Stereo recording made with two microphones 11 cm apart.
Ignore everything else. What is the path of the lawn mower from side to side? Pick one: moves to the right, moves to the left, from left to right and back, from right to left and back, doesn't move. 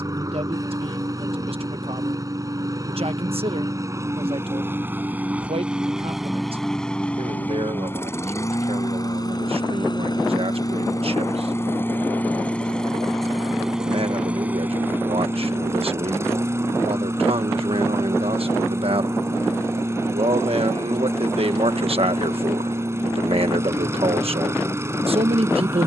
from right to left and back.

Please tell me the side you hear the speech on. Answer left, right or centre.
right.